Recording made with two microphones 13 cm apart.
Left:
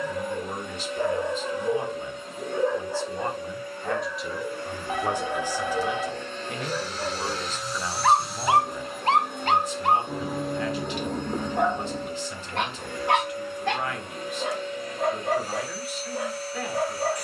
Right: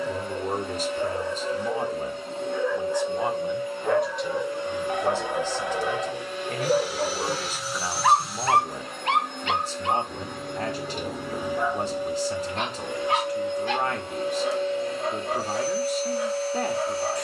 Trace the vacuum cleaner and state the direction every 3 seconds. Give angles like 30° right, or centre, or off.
30° right, 20° right, 10° right, centre, 20° right, 30° right.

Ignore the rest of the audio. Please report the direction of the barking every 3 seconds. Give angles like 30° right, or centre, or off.
50° left, 40° right, 20° right, 60° left, 70° left, 70° left.